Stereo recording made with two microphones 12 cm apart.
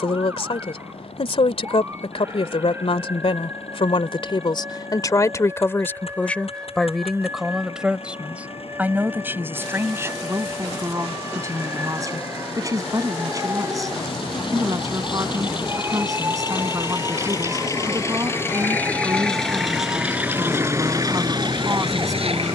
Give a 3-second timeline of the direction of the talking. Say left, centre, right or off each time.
left, left, centre, right, right, right, right, right.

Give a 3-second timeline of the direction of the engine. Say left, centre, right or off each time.
left, left, left, left, left, left, centre, right.